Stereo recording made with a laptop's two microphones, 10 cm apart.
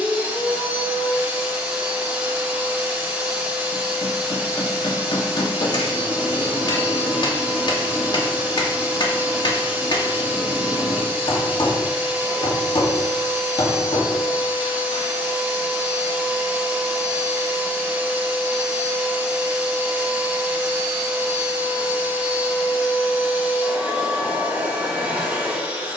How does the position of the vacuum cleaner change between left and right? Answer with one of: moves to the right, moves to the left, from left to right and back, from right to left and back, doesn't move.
doesn't move.